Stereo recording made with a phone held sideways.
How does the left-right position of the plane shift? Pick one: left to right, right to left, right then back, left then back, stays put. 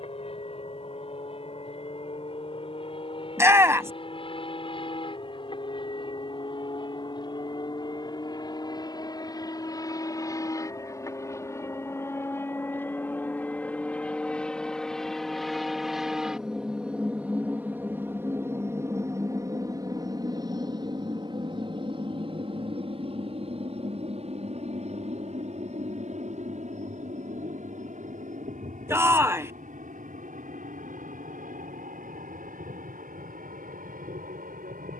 left to right.